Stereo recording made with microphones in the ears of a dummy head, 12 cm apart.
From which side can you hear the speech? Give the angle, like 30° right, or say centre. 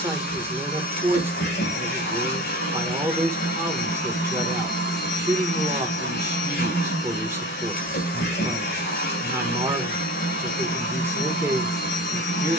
20° right.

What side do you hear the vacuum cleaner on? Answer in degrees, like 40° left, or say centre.
70° left.